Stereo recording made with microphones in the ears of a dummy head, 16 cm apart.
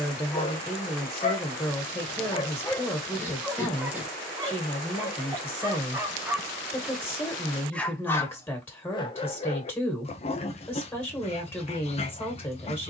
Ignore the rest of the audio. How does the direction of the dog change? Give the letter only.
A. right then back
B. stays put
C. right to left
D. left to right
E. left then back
A.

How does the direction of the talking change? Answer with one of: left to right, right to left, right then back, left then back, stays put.
stays put.